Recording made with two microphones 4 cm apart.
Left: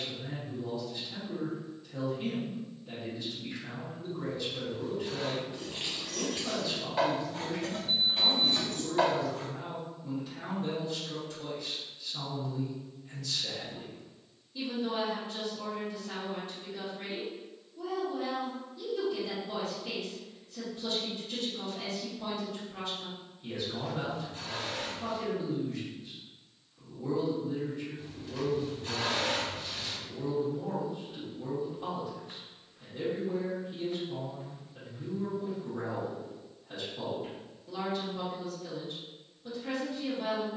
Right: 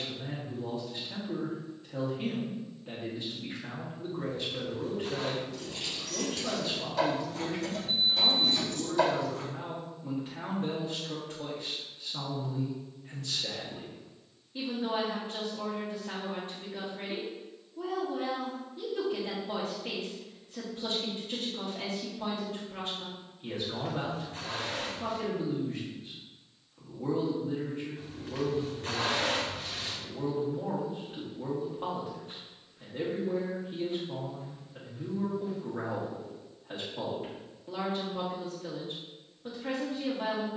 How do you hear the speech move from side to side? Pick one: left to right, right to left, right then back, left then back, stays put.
stays put.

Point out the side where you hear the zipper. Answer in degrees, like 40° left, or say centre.
80° right.